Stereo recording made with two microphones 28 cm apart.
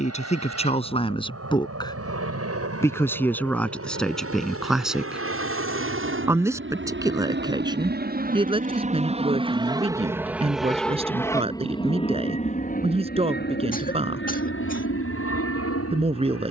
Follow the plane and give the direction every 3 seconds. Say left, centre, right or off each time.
right, right, right, centre, left, left.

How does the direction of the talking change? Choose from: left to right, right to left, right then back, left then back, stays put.
left to right.